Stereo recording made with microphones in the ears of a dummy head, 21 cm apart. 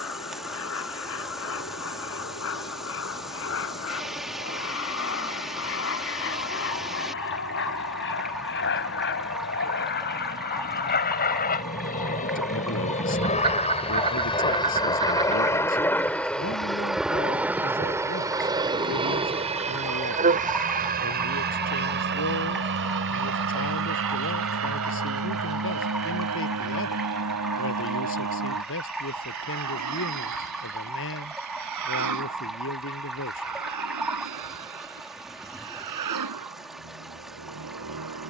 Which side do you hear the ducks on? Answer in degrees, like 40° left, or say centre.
20° right.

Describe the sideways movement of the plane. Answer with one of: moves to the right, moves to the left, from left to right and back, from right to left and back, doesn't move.
moves to the right.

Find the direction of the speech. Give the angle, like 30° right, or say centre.
50° left.